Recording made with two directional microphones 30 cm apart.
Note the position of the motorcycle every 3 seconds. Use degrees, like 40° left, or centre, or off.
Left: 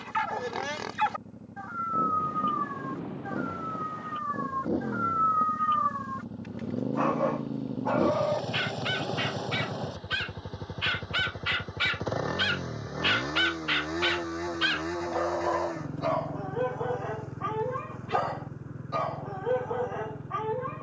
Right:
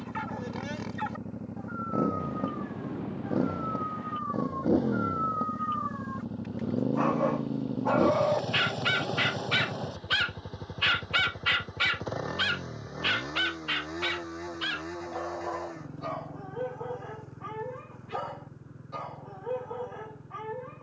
60° right, 40° right, 20° right, 10° left, 30° left, 40° left, 50° left.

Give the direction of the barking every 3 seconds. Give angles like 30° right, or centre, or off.
50° left, 30° left, 10° right, 30° right, 10° left, 40° left, 40° left.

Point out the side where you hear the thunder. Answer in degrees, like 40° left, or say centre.
10° right.